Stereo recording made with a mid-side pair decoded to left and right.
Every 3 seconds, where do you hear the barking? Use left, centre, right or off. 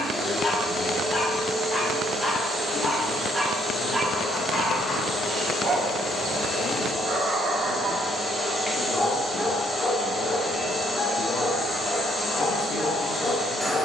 left, right, right, left, left.